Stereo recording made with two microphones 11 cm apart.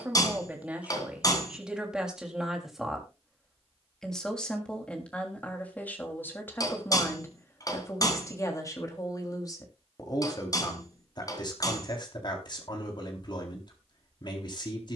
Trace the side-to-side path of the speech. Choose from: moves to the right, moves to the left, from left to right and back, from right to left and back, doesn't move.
moves to the left.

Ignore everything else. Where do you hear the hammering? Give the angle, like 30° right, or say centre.
30° left.